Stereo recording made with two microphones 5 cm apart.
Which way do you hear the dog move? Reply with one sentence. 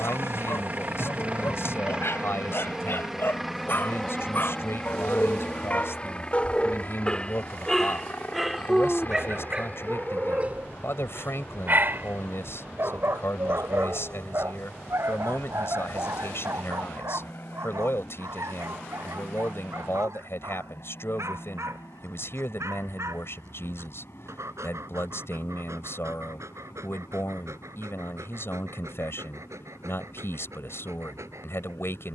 You can hear the dog travel towards the right.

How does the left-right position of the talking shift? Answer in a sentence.
You can hear the talking stay put.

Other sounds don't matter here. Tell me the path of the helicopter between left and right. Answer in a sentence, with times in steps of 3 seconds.
You can hear the helicopter on the right from 0 s, in the centre from 3 s and on the left from 6 s.